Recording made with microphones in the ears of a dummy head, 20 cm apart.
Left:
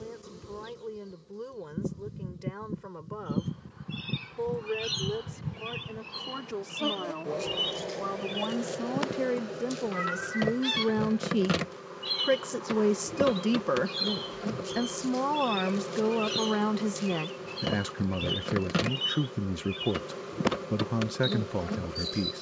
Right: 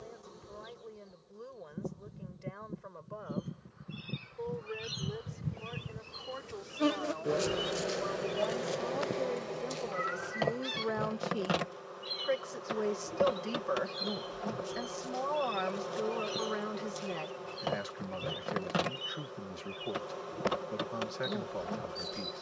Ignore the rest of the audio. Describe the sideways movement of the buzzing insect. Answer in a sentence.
You can hear the buzzing insect move from left to right and back again.